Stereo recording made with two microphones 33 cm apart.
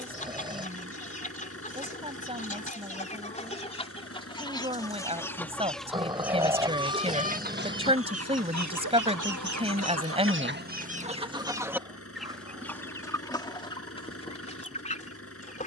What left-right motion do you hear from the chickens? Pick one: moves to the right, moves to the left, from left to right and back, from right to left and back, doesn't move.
from left to right and back.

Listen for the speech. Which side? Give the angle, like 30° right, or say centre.
20° right.